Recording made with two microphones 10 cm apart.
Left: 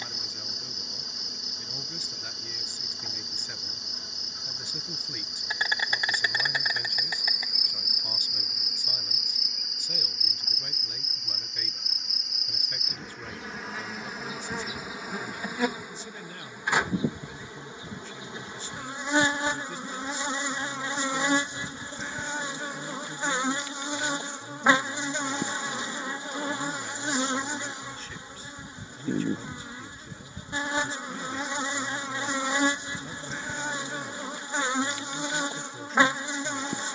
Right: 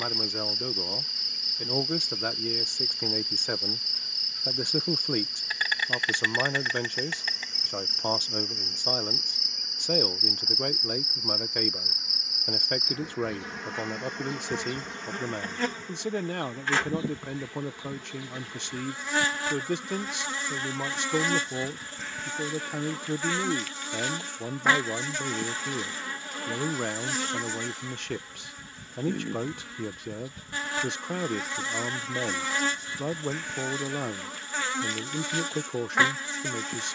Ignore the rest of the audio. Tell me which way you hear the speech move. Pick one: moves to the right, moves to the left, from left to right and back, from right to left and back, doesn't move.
doesn't move.